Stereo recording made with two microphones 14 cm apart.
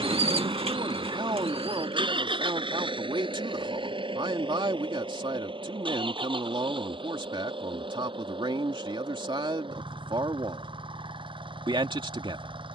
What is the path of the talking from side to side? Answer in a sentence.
You can hear the talking stay in one place.